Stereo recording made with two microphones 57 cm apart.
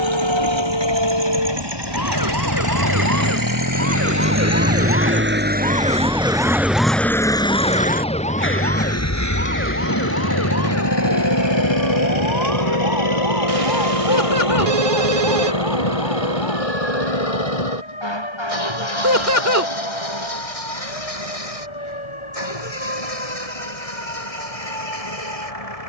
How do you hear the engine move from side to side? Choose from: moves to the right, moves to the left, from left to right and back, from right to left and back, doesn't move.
moves to the left.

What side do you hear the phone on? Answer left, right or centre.
right.